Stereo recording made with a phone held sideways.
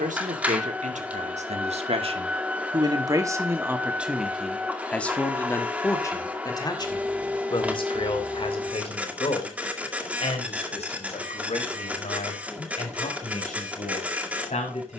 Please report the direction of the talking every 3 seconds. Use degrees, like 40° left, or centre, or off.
50° right, centre, 30° left, 50° left, 50° left.